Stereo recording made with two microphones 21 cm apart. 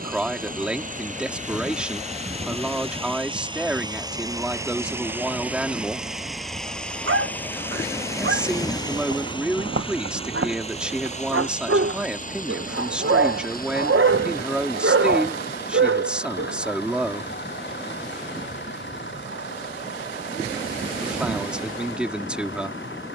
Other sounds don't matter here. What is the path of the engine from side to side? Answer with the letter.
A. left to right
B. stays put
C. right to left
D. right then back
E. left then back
C.